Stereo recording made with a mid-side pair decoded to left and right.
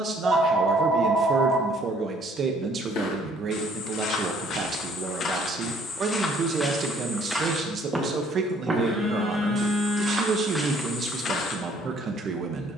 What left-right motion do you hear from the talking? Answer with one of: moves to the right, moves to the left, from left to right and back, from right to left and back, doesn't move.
doesn't move.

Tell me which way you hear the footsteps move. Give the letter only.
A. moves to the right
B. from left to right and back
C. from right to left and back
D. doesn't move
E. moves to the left
B.